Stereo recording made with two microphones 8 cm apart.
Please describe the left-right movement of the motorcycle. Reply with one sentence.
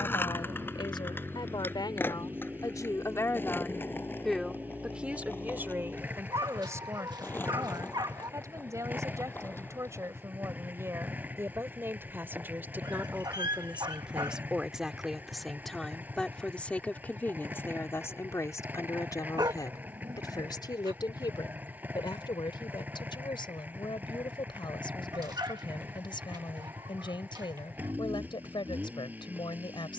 In this clip you hear the motorcycle stay put.